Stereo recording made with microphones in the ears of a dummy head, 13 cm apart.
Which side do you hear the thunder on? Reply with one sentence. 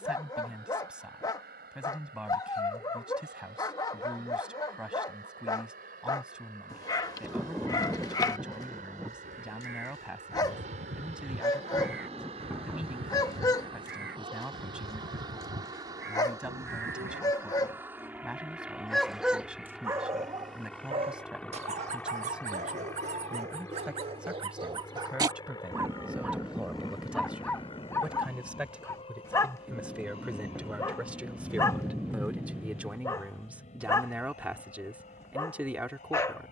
In this clip you hear the thunder in the centre.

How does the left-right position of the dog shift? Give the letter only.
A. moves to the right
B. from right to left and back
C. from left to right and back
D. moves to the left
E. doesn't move
C.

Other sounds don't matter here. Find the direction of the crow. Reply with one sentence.
In this clip you hear the crow on the right.